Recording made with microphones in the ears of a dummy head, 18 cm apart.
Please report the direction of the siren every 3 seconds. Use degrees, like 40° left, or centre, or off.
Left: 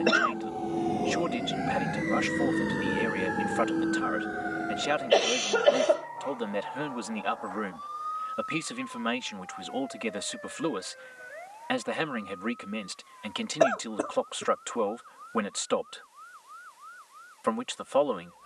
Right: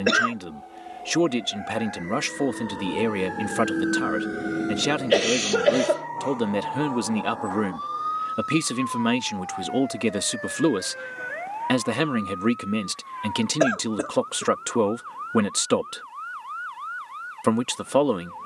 50° left, 30° right, 70° right, 80° right, 80° right, 80° right.